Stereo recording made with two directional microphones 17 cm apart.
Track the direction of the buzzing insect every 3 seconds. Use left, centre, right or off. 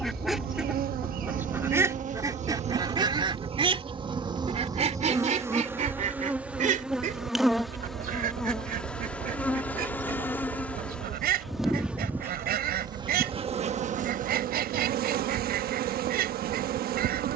right, right, centre, centre, right, right.